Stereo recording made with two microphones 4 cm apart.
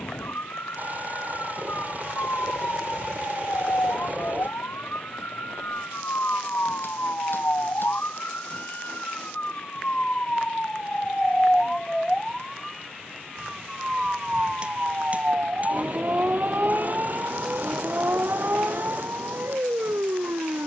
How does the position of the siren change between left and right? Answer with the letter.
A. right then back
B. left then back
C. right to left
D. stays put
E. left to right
E.